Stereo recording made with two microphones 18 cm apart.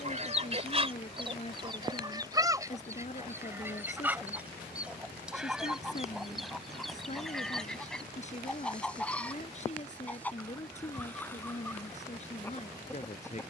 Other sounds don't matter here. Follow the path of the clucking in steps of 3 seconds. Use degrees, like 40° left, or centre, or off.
30° right, 10° right, centre, 10° left, 10° left.